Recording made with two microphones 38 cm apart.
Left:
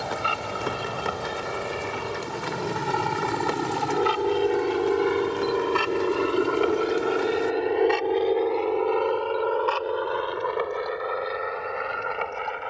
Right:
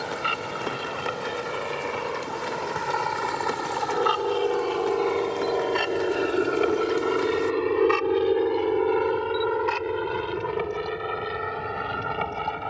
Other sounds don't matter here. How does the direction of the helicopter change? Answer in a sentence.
In this clip you hear the helicopter travel towards the right.